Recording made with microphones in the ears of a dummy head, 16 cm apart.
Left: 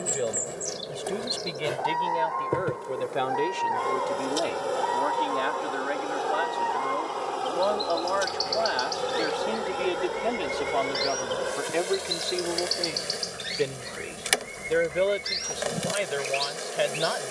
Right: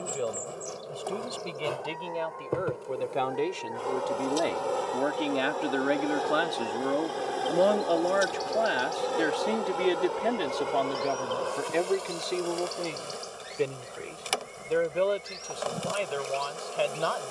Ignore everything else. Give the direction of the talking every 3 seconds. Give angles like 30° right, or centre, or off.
10° left, 20° right, 40° right, 10° right, 10° left, 10° left.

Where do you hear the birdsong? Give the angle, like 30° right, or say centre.
70° left.